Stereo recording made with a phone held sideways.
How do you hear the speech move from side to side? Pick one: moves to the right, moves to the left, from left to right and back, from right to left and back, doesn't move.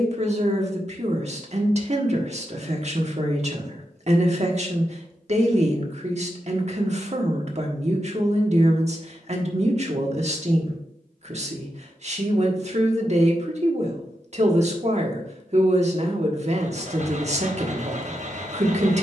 doesn't move.